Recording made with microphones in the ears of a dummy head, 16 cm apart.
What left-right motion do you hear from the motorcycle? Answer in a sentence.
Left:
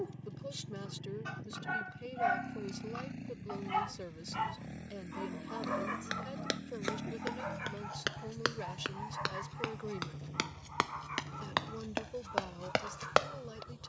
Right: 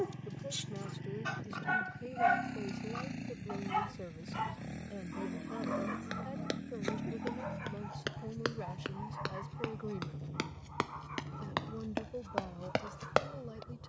You can hear the motorcycle travel towards the left.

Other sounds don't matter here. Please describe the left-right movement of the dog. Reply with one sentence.
You can hear the dog move to the left.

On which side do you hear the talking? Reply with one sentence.
You can hear the talking on the left.